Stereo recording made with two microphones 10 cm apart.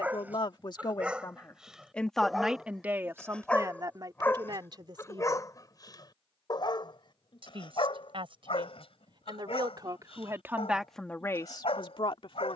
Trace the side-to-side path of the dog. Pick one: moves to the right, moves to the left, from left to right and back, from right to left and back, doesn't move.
moves to the left.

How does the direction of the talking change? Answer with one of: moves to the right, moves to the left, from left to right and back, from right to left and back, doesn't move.
from left to right and back.